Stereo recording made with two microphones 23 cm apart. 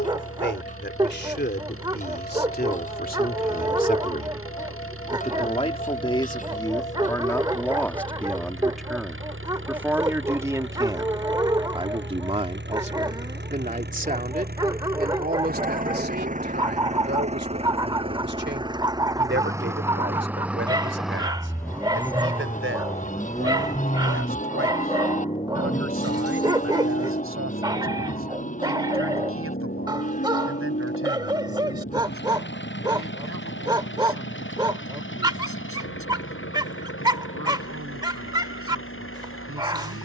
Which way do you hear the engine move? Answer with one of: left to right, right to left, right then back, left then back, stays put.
right to left.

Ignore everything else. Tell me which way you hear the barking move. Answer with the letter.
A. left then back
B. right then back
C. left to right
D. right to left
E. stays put
E.